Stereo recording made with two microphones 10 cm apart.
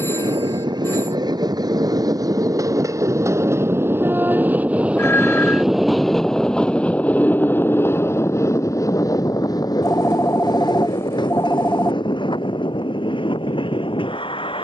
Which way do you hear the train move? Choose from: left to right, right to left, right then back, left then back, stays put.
right to left.